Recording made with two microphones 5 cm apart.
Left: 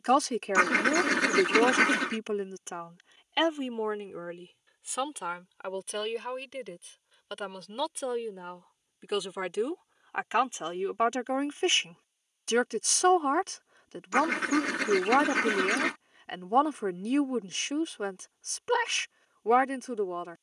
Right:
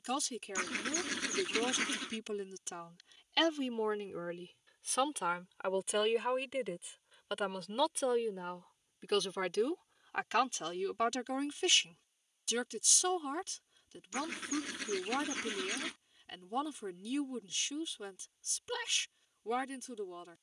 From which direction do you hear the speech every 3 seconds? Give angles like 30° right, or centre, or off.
50° left, 10° left, centre, 20° left, 50° left, 50° left, 50° left.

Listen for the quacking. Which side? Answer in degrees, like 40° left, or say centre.
80° left.